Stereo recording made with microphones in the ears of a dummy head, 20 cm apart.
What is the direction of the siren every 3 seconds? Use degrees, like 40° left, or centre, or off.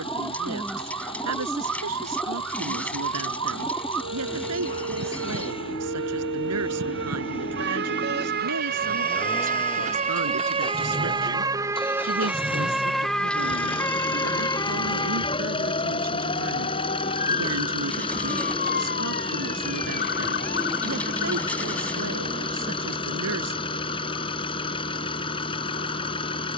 80° right, 70° right, 50° right, 30° right, 10° left, 30° left, 40° left, 50° left, 60° left.